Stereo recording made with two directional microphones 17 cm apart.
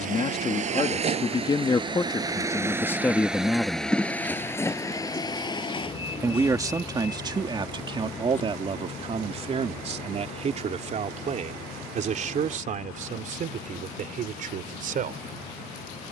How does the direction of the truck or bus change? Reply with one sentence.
In this clip you hear the truck or bus move to the left.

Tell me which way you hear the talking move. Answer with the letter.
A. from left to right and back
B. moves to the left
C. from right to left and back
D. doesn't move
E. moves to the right
E.